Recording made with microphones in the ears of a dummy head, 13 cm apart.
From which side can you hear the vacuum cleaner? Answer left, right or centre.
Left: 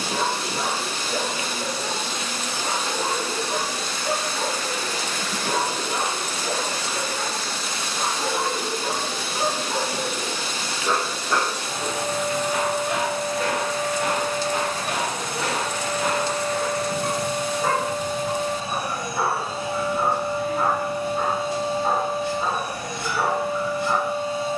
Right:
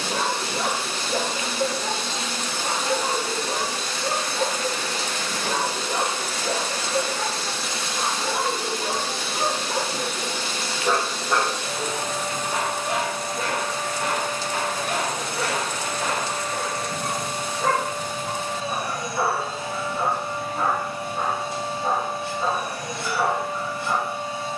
right.